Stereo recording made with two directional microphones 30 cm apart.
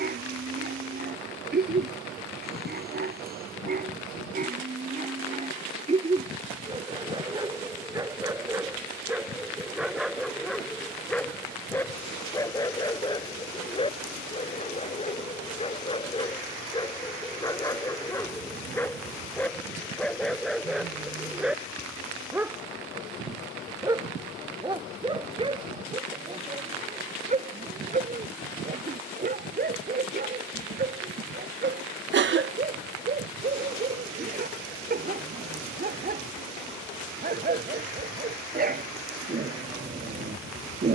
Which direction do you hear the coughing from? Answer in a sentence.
In this clip you hear the coughing on the right.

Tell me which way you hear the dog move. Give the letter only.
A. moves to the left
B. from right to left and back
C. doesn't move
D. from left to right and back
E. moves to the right
B.